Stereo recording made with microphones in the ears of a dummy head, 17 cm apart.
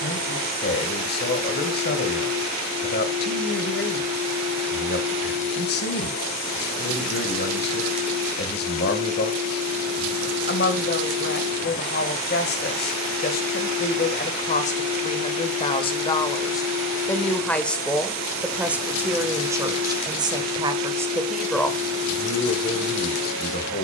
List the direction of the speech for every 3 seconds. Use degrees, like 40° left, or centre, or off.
50° left, 50° left, 50° left, 50° left, 50° left, 20° left, 10° right, 30° left.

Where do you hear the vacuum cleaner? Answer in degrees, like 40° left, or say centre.
50° right.